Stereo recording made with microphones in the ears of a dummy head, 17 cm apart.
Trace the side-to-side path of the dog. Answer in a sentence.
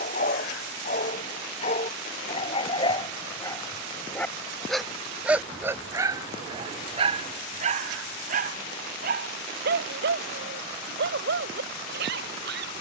You can hear the dog move from left to right.